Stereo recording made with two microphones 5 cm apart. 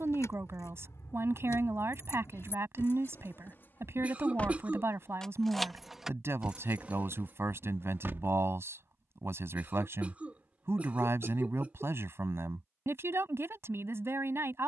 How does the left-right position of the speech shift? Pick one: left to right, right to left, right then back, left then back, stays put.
stays put.